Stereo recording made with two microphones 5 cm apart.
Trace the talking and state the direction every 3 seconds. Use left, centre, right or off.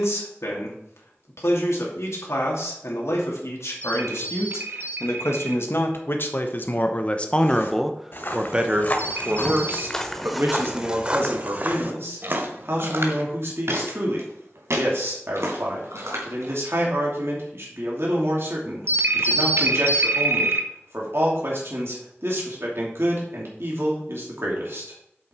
left, left, centre, right, right, right, right, right, right.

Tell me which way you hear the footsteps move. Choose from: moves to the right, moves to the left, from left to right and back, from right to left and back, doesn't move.
moves to the right.